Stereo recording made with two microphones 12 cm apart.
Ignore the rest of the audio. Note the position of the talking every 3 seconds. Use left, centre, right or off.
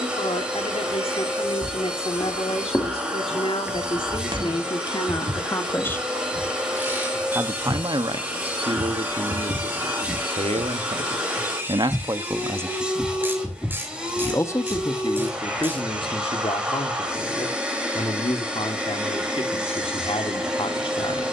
left, left, right, right, centre, left, left.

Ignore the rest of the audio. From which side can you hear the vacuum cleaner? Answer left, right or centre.
centre.